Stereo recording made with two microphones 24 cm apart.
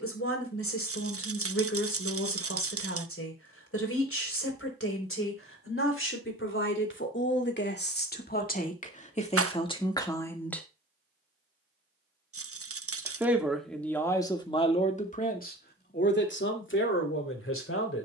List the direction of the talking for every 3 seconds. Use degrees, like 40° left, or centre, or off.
70° left, 60° left, 50° left, 20° left, 10° left, 50° left.